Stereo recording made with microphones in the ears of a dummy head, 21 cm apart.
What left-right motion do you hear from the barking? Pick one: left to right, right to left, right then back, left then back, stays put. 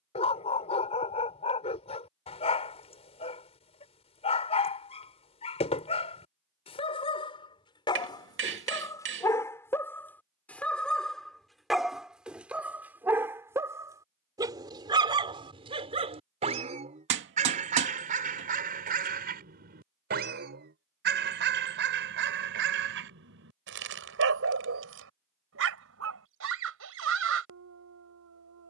left to right.